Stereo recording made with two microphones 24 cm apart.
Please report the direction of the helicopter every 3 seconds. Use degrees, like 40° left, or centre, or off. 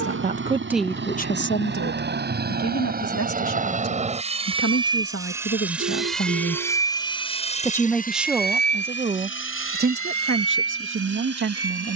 50° right, 20° right, 20° left, 60° left.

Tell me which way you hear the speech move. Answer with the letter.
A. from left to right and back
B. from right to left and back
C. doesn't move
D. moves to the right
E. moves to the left
B.